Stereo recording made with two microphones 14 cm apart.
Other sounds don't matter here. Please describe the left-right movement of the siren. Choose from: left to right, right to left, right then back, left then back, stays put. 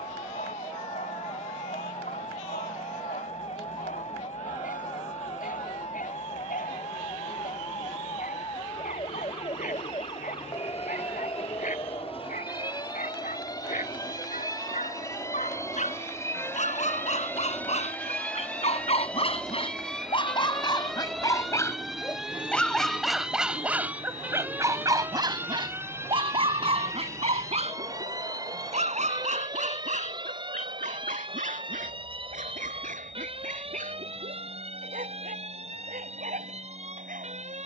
left to right.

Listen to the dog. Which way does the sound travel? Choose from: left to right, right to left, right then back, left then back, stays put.
left to right.